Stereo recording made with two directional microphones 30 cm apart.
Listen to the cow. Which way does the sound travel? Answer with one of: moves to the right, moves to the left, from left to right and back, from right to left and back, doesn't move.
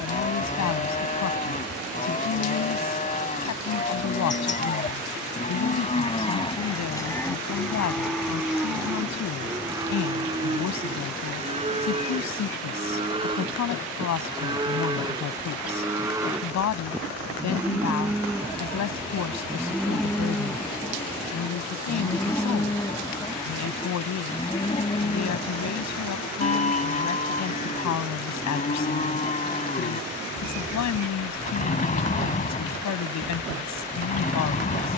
from left to right and back.